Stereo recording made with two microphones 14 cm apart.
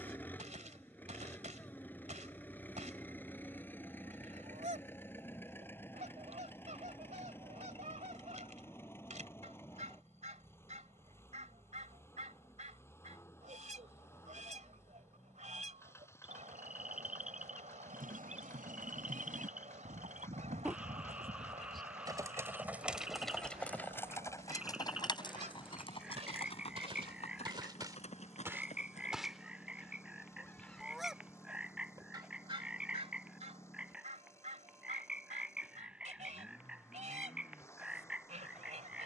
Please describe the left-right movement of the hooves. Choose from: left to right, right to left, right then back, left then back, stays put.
right to left.